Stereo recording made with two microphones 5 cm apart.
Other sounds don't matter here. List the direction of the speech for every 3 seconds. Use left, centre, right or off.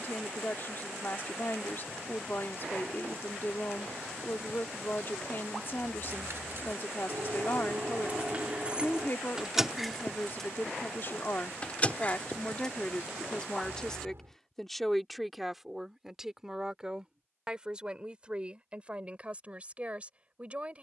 left, left, left, left, left, centre, right.